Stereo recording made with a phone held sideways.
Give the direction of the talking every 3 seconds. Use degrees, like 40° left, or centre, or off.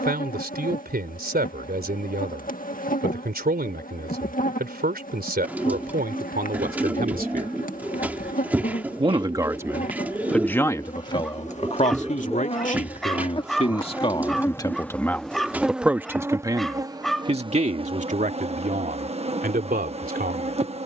70° right, 70° right, 60° right, 10° left, 40° left, 20° right, 60° right.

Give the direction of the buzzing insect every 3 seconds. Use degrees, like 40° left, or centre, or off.
60° left, 60° left, 60° left, 50° left, 30° left, 20° right, 40° right.